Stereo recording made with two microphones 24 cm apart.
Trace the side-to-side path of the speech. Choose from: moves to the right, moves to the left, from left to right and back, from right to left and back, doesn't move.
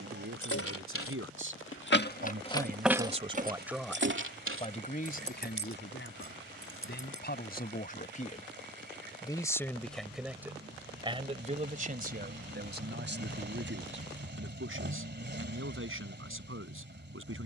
from right to left and back.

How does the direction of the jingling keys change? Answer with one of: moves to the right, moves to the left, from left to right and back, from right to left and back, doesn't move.
moves to the right.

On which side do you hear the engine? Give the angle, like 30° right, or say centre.
50° right.